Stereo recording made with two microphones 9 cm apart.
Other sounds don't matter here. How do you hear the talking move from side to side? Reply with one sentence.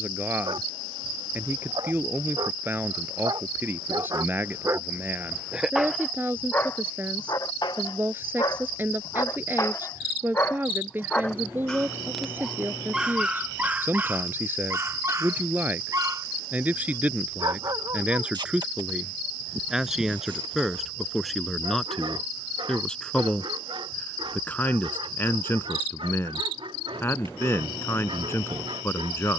You can hear the talking move to the left.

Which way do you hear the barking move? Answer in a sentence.
In this clip you hear the barking move from right to left and back again.